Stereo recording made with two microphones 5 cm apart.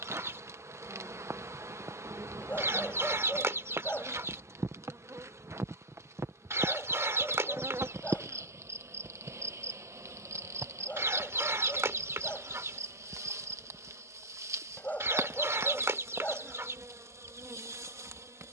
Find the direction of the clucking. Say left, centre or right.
right.